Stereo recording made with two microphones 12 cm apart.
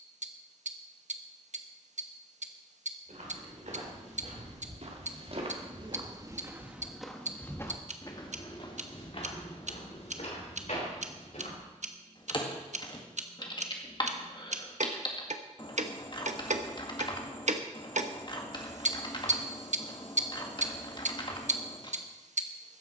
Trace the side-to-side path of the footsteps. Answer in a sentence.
You can hear the footsteps travel towards the left.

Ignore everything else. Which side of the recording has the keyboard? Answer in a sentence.
In this clip you hear the keyboard on the left.